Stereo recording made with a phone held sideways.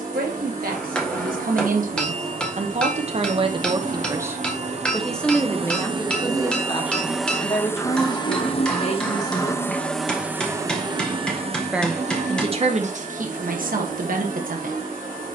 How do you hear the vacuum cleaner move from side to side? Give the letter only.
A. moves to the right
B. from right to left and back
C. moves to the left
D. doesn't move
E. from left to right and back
B.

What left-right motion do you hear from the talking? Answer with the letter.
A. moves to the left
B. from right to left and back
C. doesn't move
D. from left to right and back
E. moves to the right
B.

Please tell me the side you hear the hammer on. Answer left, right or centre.
centre.